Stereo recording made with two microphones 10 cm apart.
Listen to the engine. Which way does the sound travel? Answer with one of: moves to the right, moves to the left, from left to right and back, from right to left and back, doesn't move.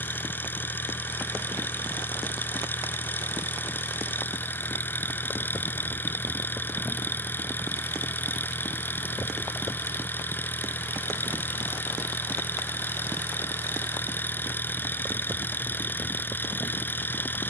doesn't move.